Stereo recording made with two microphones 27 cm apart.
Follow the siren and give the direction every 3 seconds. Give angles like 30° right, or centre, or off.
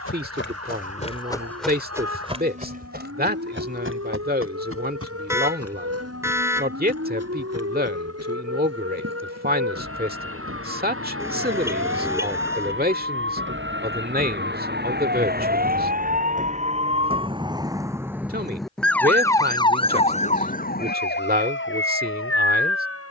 70° right, 60° right, 60° right, 60° right, 50° right, 30° right, 10° left, 50° left.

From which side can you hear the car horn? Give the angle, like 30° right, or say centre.
10° right.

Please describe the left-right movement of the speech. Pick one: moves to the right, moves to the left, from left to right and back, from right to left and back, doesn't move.
doesn't move.